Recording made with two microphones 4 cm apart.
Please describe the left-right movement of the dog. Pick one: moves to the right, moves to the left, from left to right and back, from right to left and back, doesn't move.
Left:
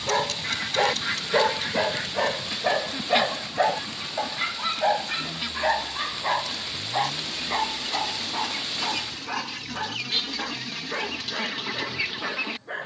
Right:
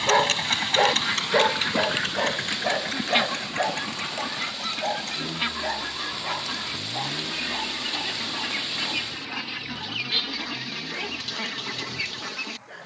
moves to the left.